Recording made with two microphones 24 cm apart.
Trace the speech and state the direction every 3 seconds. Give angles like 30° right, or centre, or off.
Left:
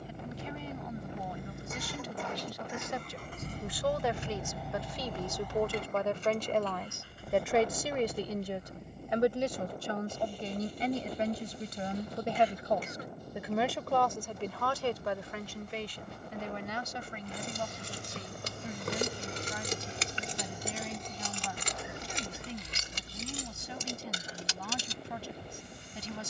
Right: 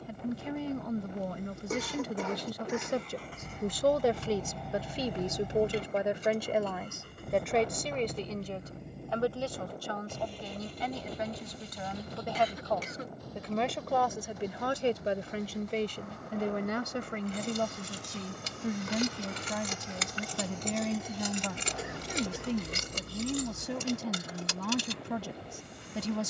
60° right, 30° right, centre, 30° left, centre, 50° right, 70° right, 70° right, 70° right.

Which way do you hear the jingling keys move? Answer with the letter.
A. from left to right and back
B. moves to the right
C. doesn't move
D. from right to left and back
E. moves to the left
B.